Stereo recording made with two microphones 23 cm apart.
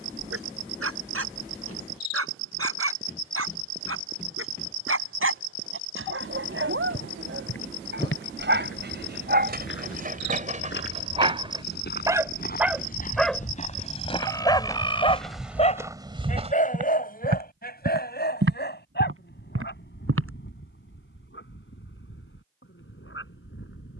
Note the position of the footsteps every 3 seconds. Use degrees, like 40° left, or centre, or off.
off, off, 60° left, 50° left, 30° left, 20° right, 70° right, off.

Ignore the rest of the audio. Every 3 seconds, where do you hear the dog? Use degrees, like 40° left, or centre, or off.
80° right, 70° right, 60° right, 30° right, 10° left, 40° left, 50° left, 60° left.